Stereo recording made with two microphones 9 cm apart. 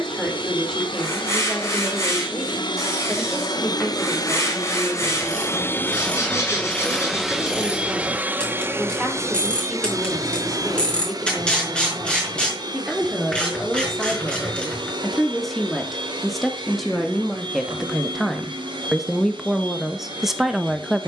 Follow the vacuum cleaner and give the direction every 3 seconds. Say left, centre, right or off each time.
left, left, centre, right, right, right, right.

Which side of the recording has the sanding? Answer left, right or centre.
left.